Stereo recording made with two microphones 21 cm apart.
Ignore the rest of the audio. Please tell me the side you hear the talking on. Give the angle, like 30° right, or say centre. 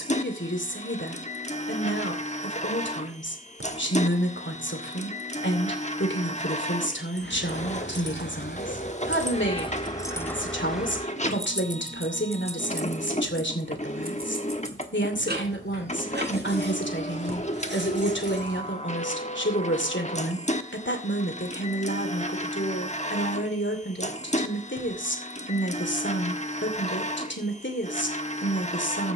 60° left.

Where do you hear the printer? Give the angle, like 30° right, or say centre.
30° left.